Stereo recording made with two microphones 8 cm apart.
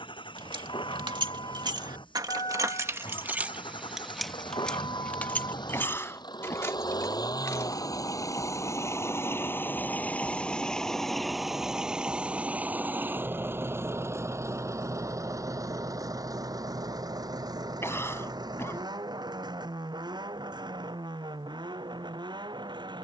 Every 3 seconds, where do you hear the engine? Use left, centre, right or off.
left, left, left, centre, right, right, right, right.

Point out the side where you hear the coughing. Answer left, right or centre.
left.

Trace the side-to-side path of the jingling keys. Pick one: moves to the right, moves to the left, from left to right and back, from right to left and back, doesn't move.
moves to the left.